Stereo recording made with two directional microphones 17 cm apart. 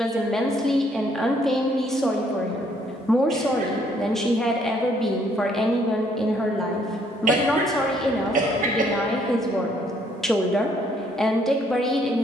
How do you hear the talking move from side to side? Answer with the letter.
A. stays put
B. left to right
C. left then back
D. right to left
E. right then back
A.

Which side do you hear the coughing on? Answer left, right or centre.
right.